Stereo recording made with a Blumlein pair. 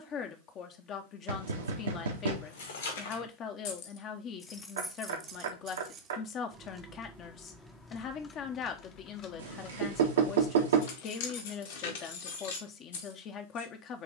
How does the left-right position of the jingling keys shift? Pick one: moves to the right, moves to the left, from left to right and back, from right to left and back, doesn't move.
from left to right and back.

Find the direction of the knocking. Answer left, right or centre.
right.